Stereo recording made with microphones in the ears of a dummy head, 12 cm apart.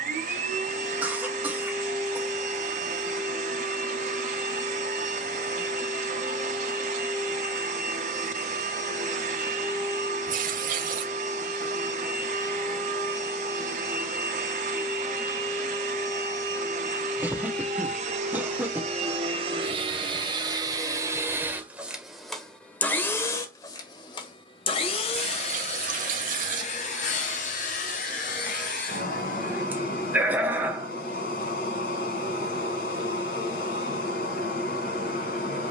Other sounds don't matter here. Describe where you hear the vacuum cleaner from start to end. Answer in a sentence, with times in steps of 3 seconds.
You can hear the vacuum cleaner on the right from 0 s, in the centre from 21 s and on the left from 24 s.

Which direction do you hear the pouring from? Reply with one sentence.
In this clip you hear the pouring on the right.